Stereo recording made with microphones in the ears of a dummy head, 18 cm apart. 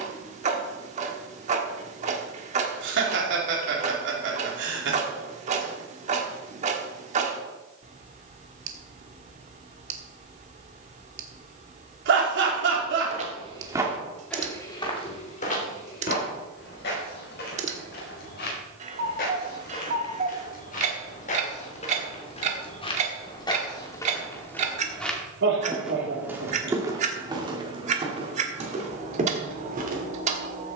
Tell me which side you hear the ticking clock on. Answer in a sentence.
In this clip you hear the ticking clock on the right.